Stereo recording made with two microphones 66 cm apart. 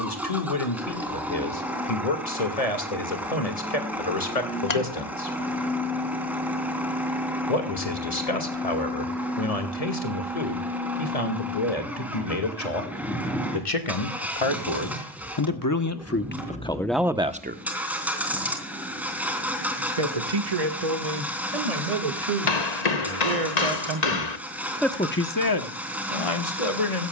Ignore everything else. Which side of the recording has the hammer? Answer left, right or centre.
left.